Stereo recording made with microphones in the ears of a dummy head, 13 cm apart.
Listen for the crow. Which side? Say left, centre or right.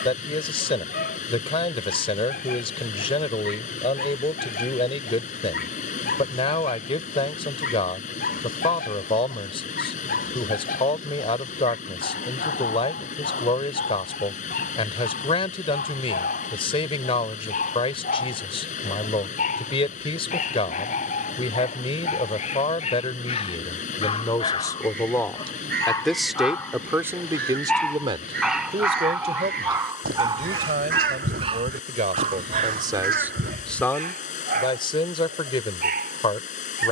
right.